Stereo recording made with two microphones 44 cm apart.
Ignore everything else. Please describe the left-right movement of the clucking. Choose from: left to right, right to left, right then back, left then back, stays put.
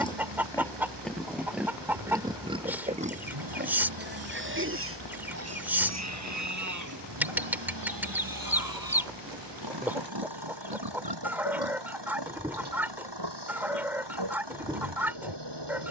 stays put.